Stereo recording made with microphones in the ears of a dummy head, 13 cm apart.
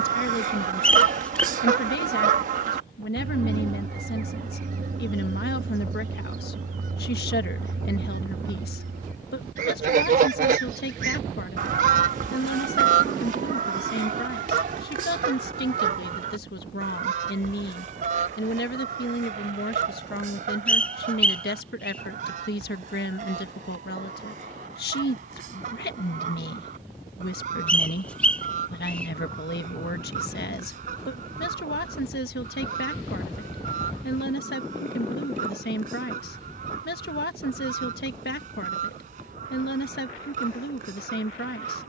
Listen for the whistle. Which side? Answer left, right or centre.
centre.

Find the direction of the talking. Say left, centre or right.
left.